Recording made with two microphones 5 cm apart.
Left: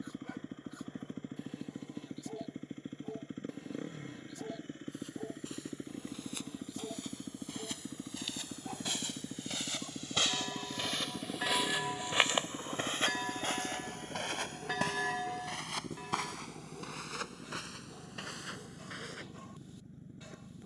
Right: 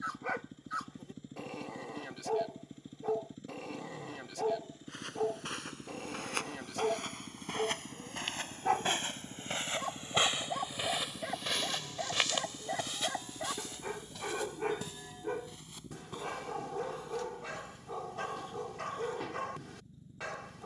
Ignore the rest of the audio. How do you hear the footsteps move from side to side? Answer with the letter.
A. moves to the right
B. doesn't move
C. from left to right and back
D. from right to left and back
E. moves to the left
E.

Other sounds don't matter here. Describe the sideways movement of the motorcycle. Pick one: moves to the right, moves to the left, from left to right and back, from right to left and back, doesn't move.
doesn't move.